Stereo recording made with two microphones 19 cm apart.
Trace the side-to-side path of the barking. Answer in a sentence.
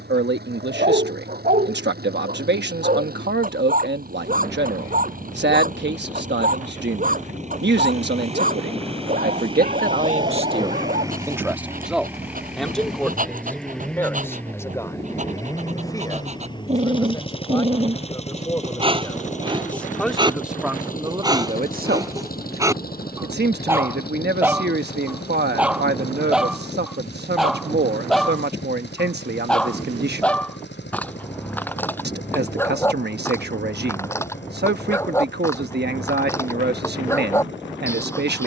You can hear the barking move from right to left.